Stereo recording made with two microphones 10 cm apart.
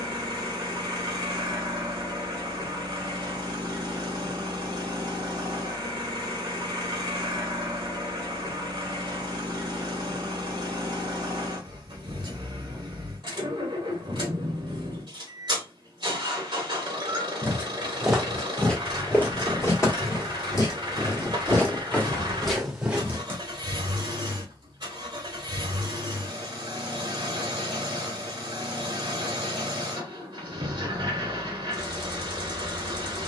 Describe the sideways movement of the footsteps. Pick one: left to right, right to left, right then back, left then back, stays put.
left then back.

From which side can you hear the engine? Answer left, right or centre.
right.